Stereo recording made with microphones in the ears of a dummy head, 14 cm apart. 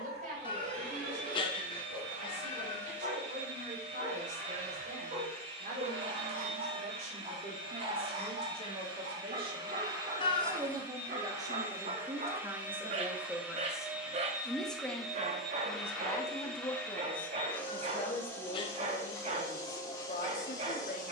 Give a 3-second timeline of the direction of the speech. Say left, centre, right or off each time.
right, right, right, right, centre, left, left.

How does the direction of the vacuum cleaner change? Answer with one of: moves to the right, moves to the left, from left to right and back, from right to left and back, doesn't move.
moves to the left.